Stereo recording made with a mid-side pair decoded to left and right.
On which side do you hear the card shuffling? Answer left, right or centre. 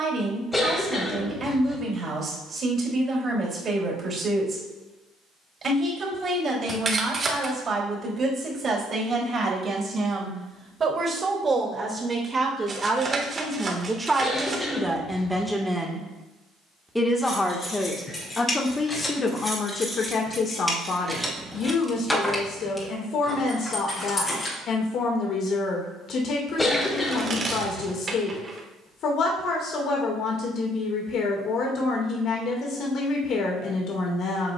right.